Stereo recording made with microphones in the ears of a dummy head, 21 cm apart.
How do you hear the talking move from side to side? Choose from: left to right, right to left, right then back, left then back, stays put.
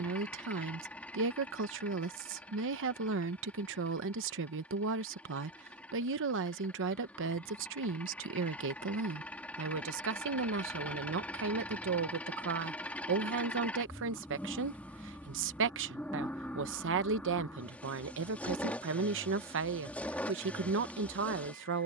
stays put.